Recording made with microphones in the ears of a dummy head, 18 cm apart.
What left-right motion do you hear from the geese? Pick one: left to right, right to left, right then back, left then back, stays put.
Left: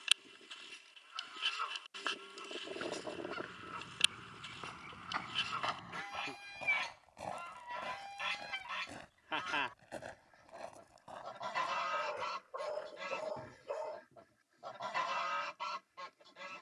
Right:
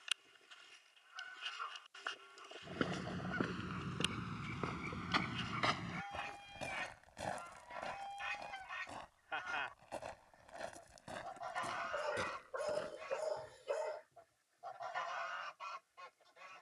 stays put.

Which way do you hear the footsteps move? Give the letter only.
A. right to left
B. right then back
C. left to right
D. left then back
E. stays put
D.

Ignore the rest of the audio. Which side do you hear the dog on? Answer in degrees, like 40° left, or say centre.
20° right.